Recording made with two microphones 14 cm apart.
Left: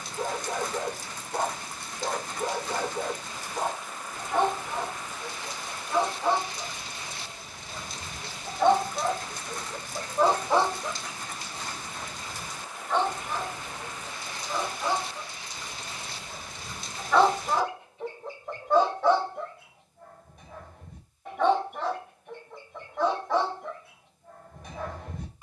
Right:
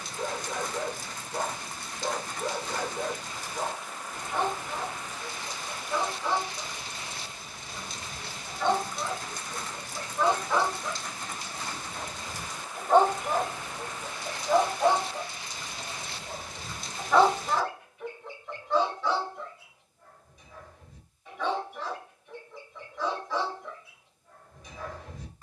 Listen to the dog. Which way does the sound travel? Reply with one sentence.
In this clip you hear the dog move from left to right and back again.